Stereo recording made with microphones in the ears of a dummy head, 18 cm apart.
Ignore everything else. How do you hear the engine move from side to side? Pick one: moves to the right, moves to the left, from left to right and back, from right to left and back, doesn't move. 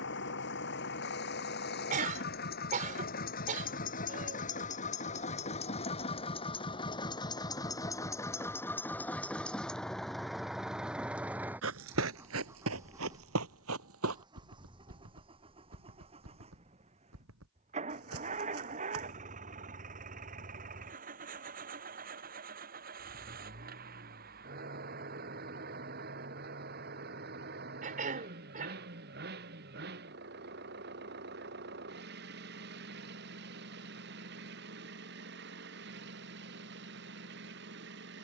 moves to the right.